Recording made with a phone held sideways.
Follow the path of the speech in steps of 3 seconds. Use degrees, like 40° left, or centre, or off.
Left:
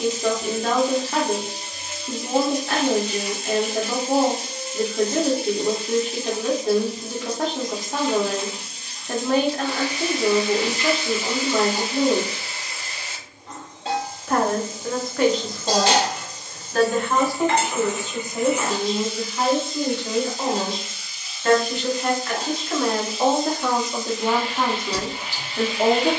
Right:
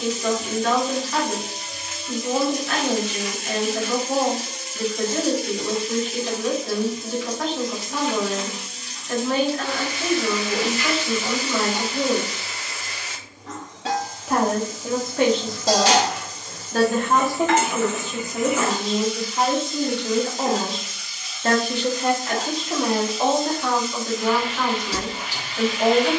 30° left, 30° left, 30° left, 30° left, centre, 30° right, 50° right, 10° right, 20° left.